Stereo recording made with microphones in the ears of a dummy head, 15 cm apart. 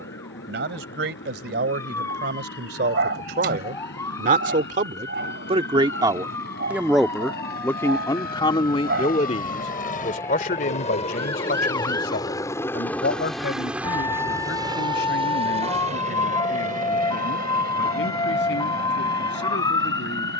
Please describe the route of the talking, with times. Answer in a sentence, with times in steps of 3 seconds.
You can hear the talking on the right from 0 s, in the centre from 6 s and on the left from 9 s.